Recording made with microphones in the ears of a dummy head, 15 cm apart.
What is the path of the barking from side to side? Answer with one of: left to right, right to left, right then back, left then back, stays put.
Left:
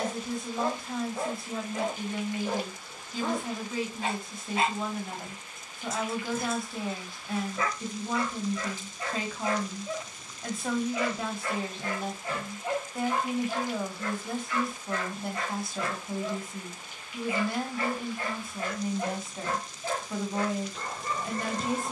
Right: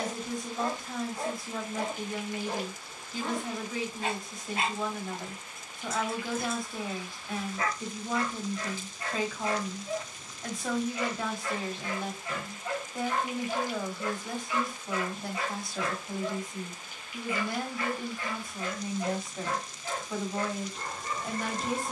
right then back.